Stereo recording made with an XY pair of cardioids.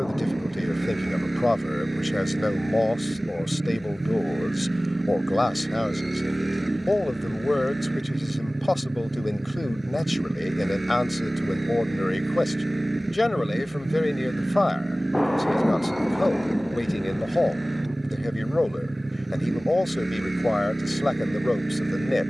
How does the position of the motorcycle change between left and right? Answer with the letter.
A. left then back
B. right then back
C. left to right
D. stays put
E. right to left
D.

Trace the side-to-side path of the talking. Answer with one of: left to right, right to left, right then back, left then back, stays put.
stays put.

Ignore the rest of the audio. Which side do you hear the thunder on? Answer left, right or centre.
centre.